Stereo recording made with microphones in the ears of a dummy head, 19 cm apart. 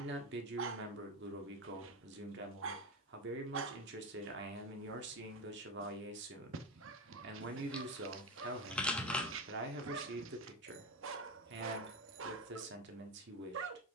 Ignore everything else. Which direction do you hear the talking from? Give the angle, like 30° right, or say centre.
60° right.